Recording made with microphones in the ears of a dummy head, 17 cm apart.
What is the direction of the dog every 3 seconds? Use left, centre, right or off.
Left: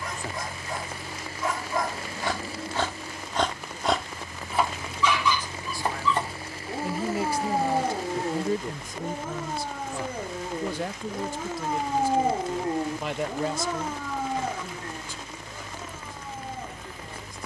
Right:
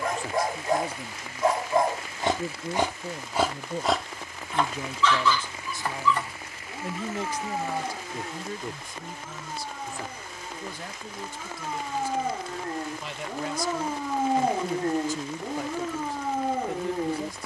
right, centre, left, left, centre, right.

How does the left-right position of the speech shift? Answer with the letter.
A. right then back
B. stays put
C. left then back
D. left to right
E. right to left
C.